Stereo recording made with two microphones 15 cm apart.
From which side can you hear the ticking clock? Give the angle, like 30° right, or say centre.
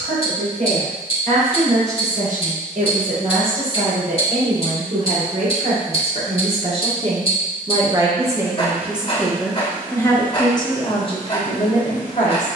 40° left.